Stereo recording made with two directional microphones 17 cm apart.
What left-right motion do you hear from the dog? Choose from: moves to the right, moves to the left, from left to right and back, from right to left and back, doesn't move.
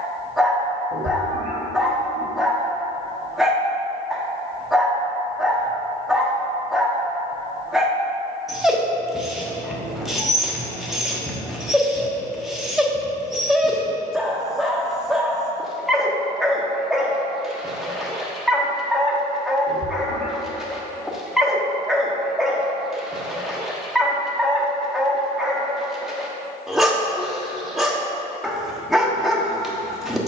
doesn't move.